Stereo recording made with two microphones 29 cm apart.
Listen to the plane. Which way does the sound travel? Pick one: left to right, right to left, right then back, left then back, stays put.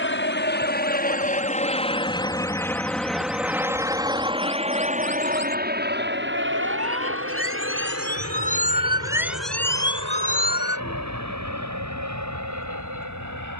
left to right.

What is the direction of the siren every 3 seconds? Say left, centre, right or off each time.
right, right, right, left, left.